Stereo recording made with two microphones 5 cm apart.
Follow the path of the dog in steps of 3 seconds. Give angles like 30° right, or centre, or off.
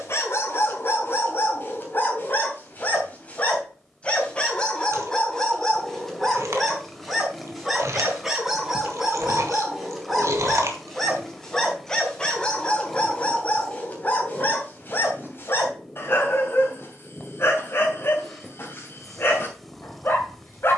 50° left, 20° left, centre, centre, 30° left, 50° left, 50° left.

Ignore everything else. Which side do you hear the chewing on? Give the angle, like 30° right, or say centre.
70° right.